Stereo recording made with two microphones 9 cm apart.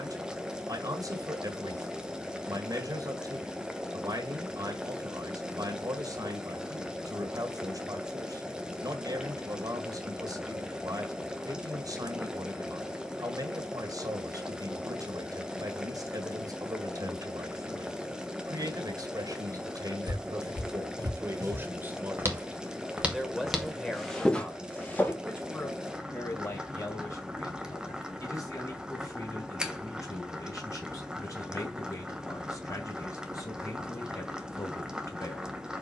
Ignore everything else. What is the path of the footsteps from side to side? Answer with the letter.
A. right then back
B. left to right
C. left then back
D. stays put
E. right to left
E.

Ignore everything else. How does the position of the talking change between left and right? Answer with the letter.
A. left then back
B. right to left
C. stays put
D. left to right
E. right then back
B.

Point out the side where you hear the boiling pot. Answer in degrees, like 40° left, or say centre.
10° right.